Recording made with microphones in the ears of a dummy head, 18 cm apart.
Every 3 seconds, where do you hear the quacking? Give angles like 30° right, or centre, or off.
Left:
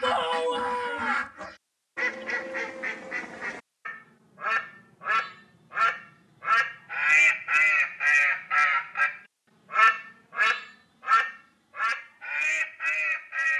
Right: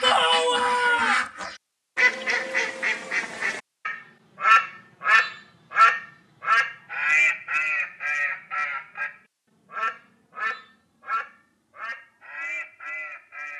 70° right, 60° right, 20° left, 50° left, 60° left.